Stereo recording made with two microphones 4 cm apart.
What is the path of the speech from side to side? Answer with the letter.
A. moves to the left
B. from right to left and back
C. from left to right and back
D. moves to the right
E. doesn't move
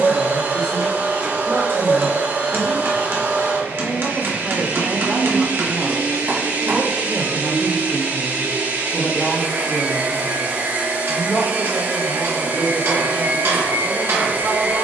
B.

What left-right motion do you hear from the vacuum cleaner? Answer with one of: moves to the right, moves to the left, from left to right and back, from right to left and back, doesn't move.
doesn't move.